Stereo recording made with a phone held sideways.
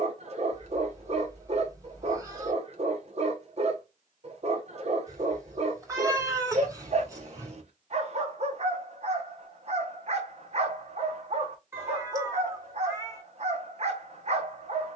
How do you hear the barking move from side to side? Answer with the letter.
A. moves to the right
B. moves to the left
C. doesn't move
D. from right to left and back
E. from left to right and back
C.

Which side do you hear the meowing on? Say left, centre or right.
right.